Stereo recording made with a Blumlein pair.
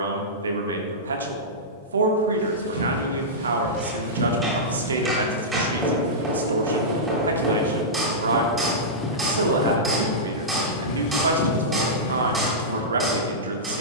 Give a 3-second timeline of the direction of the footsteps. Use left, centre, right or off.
right, right, right, left, left.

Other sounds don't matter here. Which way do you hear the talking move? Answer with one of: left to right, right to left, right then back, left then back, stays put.
stays put.